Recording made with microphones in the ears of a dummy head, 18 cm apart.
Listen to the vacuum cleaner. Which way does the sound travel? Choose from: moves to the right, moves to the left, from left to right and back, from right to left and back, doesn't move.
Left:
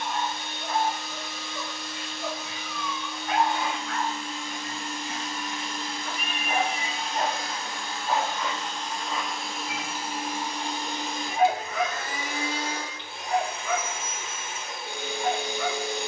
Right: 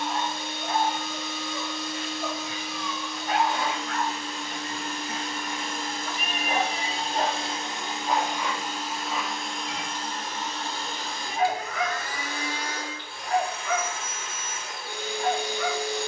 moves to the left.